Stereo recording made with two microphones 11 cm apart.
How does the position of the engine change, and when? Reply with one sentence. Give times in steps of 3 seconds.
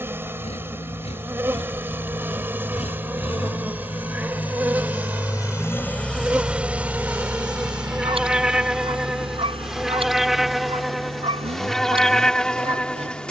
In this clip you hear the engine on the left from 0 s and on the right from 6 s.